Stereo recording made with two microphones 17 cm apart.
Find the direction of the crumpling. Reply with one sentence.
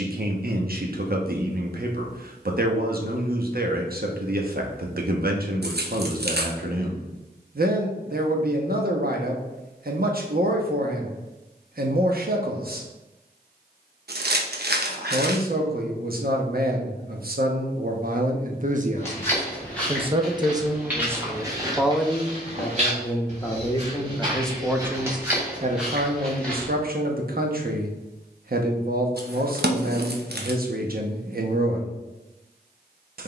In this clip you hear the crumpling on the right.